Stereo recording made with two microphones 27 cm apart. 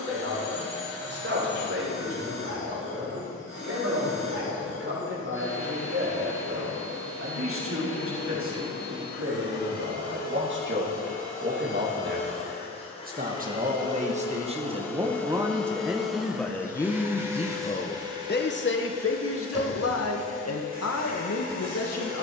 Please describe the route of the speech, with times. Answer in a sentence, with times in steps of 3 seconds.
In this clip you hear the speech on the right from 0 s, in the centre from 15 s and on the left from 18 s.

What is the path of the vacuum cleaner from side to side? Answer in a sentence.
You can hear the vacuum cleaner travel towards the right.